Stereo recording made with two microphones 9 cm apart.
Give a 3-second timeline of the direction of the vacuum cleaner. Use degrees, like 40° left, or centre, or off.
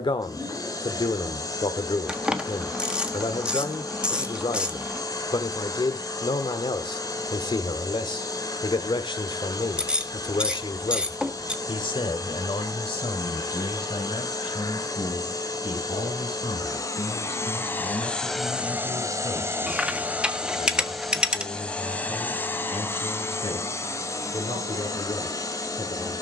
40° left, 40° left, 40° left, 40° left, 40° left, 40° left, 10° right, 20° left, 40° left.